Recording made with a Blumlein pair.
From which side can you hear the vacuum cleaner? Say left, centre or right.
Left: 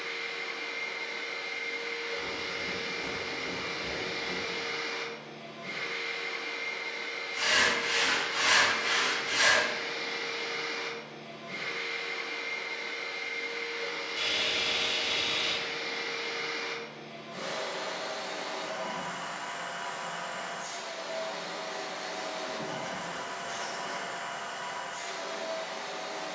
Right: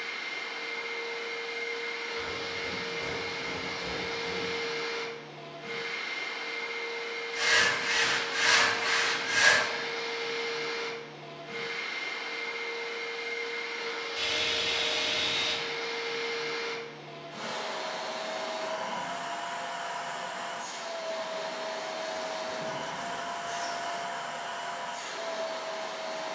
centre.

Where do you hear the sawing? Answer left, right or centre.
centre.